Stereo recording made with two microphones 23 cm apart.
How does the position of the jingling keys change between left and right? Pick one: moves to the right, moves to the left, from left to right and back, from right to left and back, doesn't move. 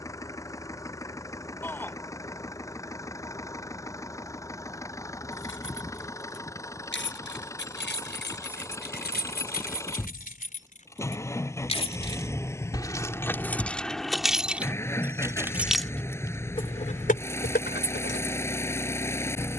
from left to right and back.